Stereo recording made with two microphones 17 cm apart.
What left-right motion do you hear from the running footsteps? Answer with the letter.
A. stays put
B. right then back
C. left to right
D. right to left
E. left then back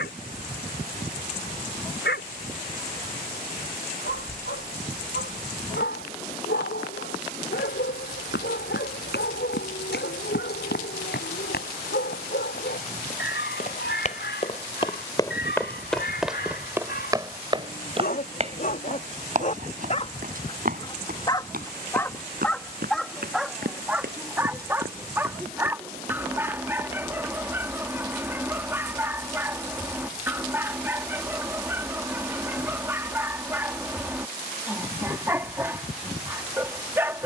C.